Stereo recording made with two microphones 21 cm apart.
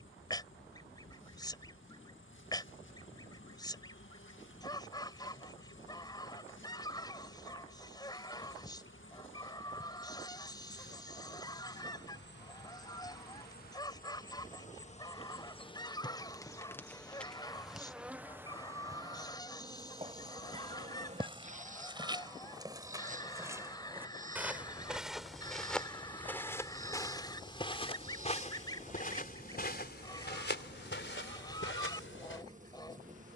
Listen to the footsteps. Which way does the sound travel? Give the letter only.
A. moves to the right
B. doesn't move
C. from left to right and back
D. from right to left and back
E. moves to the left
E.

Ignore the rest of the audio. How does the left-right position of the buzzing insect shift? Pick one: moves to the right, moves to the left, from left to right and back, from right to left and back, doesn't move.
moves to the right.